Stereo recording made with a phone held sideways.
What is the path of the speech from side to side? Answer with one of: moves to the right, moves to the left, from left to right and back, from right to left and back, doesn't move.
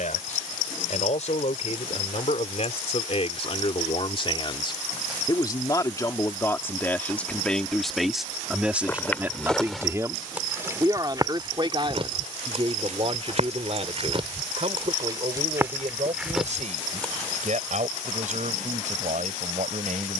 moves to the right.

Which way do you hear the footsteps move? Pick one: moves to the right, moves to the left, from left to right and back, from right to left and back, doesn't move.
from left to right and back.